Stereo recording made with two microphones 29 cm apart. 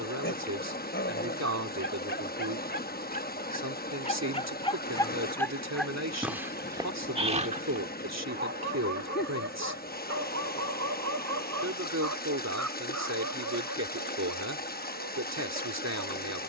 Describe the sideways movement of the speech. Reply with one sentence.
In this clip you hear the speech stay in one place.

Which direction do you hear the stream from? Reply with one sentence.
In this clip you hear the stream on the left.